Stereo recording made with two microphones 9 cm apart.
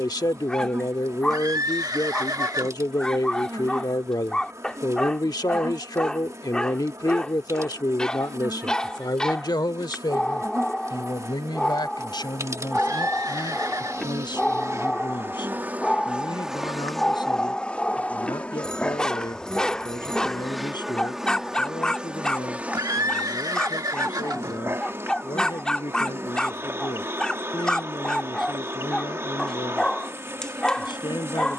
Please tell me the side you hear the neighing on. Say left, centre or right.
right.